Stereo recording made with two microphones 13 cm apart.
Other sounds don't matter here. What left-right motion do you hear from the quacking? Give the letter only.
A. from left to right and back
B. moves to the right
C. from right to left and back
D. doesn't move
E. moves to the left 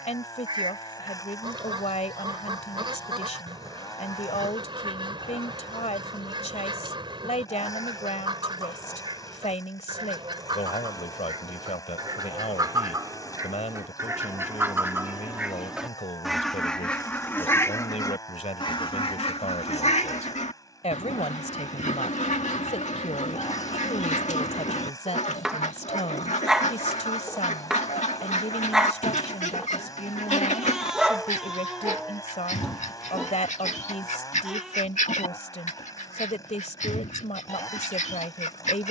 E.